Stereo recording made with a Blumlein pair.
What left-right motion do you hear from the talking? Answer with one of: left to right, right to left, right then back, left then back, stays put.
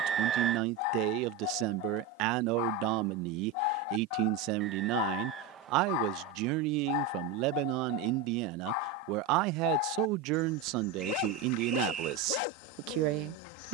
stays put.